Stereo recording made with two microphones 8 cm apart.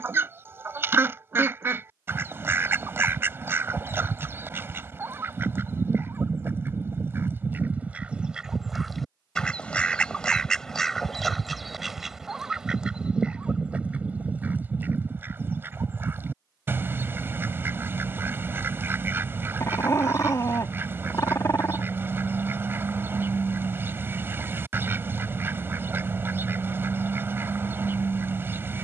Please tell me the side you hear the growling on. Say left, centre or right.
left.